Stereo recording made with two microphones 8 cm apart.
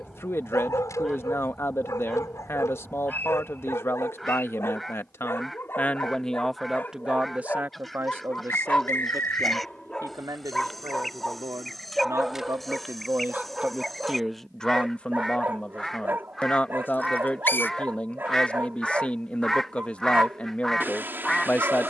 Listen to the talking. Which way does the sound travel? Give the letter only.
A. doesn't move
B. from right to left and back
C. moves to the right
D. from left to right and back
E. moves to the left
D.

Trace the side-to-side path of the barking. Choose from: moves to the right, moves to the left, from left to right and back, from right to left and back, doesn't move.
moves to the right.